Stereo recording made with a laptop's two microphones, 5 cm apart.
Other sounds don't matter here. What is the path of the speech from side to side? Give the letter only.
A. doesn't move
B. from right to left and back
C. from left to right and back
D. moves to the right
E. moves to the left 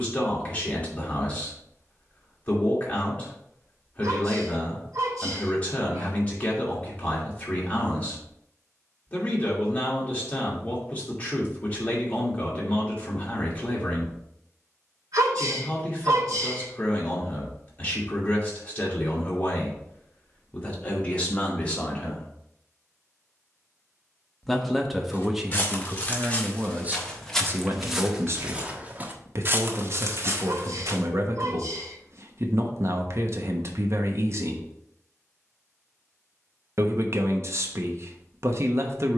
D.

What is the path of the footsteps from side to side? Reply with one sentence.
In this clip you hear the footsteps go from the left side to the right.